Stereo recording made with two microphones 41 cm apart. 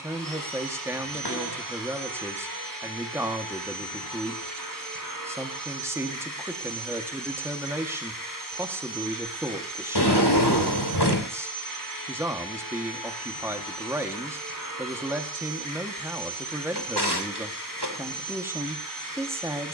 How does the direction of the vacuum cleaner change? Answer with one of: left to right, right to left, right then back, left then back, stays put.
stays put.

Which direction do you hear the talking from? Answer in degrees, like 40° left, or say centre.
10° right.